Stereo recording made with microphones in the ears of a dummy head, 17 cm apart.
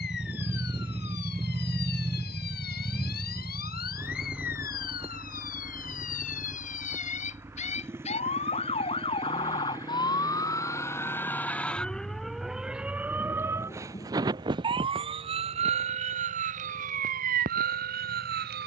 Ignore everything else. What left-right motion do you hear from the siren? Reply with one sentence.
In this clip you hear the siren go from the left side to the right.